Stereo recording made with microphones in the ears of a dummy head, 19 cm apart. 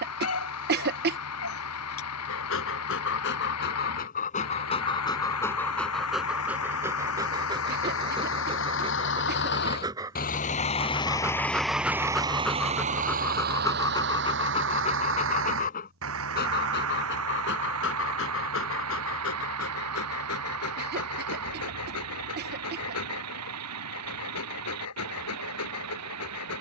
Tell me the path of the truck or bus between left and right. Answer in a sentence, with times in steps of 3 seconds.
You can hear the truck or bus on the left from 0 s and on the right from 12 s.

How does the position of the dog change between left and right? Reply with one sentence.
You can hear the dog go right and come back.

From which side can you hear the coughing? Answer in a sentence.
In this clip you hear the coughing on the right.